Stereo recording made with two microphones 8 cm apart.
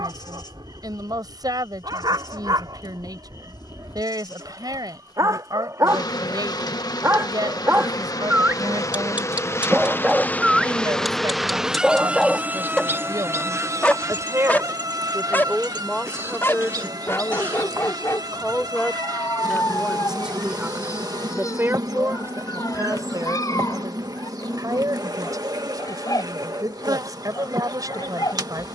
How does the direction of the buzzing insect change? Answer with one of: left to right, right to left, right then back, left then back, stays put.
left to right.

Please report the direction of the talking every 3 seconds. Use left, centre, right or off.
right, right, right, right, right, centre, centre, right, right, right.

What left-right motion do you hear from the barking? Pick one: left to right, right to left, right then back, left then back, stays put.
right to left.